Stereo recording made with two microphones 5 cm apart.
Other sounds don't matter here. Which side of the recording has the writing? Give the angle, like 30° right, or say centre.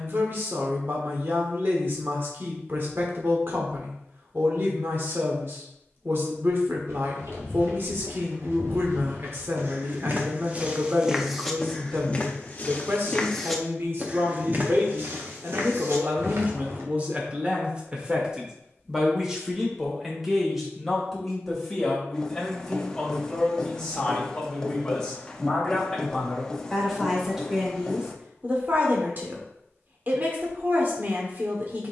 10° left.